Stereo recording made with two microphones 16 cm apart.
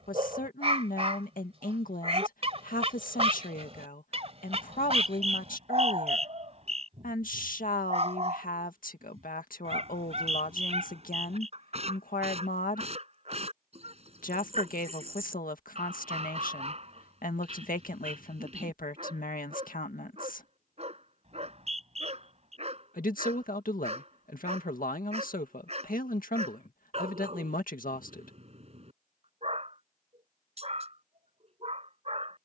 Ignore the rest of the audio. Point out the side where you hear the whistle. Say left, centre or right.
right.